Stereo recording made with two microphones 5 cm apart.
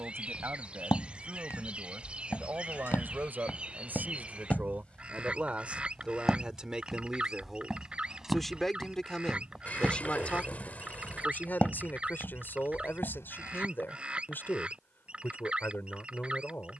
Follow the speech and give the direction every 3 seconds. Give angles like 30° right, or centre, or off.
50° right, 30° right, 10° right, 30° left, 40° left, 40° left.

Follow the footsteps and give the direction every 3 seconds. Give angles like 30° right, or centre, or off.
60° left, 30° left, centre, 10° left, 50° left, off.